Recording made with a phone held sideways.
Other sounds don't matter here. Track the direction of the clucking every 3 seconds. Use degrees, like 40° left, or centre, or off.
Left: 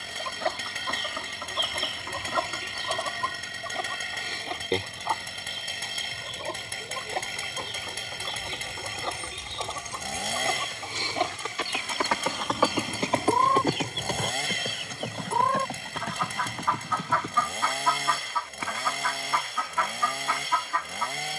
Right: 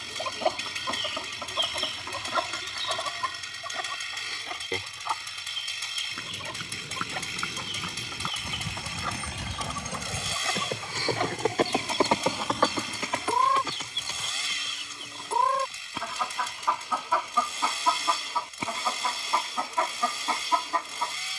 centre, 30° left, 30° left, 20° left, 10° left, 10° right, 30° right.